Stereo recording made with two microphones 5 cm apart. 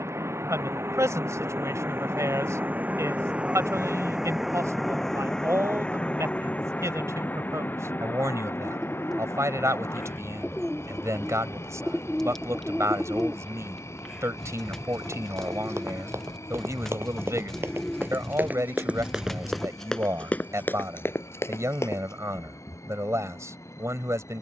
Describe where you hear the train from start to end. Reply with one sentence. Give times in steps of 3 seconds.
You can hear the train on the right from 0 s, in the centre from 3 s and on the left from 6 s.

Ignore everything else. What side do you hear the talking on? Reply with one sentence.
In this clip you hear the talking on the right.